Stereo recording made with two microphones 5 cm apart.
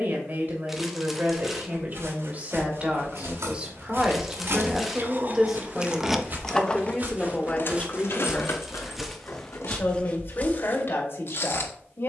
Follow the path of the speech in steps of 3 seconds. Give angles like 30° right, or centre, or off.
40° right, 10° right, 20° left, 50° left.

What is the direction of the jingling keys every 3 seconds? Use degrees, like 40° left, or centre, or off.
off, 50° right, 40° left, 70° left.